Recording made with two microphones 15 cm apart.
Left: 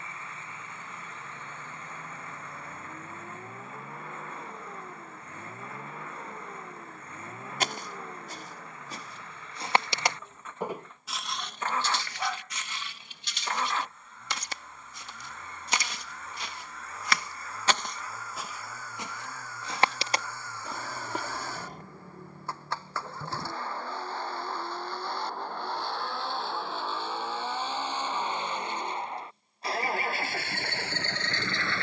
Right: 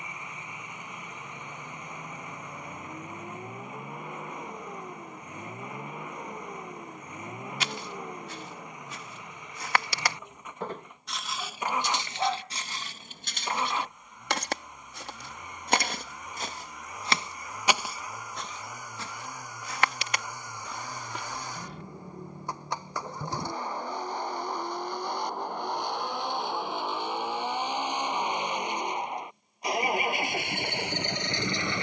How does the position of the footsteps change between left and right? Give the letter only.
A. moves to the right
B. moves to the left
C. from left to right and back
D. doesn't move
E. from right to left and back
C.